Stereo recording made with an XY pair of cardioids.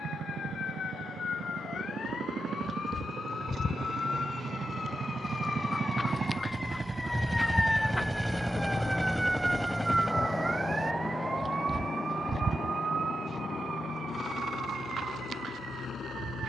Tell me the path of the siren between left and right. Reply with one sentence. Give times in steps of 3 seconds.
In this clip you hear the siren on the left from 0 s, in the centre from 6 s and on the right from 9 s.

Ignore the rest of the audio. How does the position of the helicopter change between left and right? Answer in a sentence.
In this clip you hear the helicopter go from the right side to the left.